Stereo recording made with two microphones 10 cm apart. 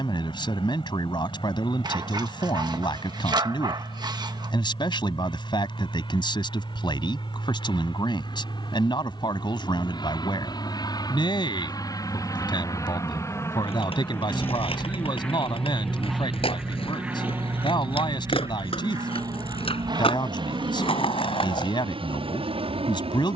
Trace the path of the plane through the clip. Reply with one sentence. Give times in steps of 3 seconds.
You can hear the plane on the left from 0 s, in the centre from 15 s and on the right from 18 s.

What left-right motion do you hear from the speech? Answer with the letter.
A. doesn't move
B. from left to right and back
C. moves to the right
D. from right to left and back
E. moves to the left
A.